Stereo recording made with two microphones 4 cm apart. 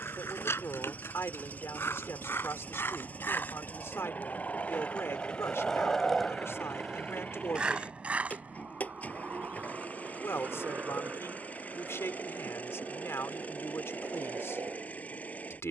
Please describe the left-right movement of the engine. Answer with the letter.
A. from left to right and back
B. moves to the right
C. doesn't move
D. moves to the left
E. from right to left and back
C.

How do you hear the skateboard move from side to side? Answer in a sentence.
In this clip you hear the skateboard travel towards the right.